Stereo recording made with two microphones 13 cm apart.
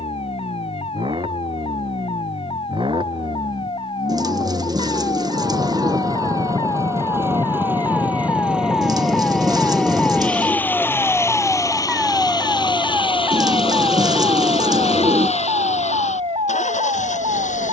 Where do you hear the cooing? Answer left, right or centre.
right.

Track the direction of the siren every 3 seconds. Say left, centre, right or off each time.
left, left, left, centre, right, right.